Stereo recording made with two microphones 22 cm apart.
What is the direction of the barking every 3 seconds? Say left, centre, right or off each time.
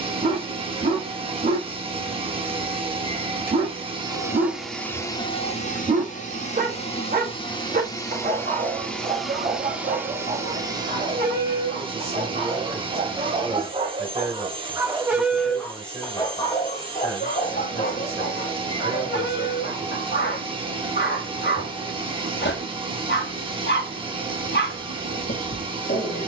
right, right, right, right, right, left, left, left, left.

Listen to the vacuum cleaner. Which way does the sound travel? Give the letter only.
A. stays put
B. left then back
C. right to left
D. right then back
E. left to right
B.